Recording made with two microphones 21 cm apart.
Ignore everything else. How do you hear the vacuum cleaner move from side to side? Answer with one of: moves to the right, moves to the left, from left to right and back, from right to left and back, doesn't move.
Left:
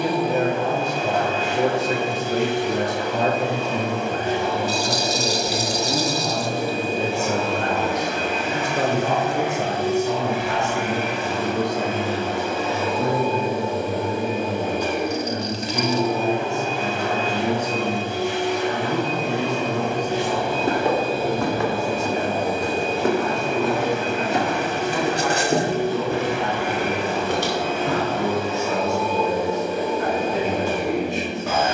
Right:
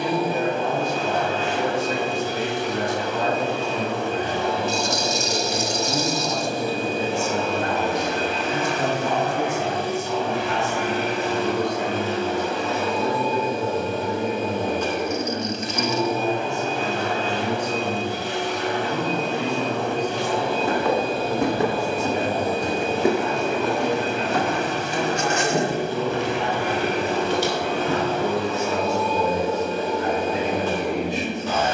doesn't move.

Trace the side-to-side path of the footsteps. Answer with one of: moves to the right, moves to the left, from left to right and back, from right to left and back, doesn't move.
from left to right and back.